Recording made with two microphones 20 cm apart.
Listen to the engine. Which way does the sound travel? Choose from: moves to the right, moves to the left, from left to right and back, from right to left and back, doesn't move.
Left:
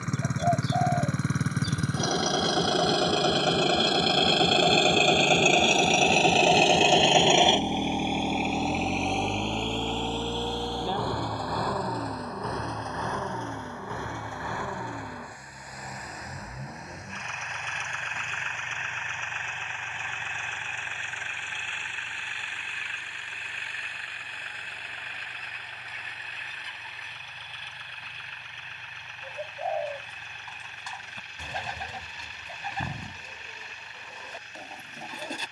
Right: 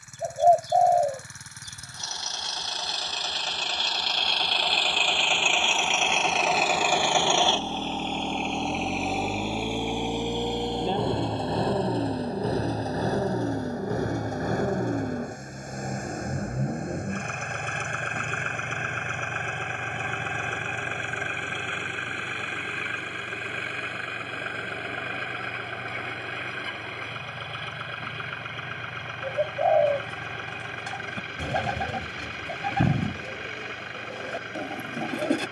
moves to the right.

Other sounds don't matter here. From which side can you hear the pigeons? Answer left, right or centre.
right.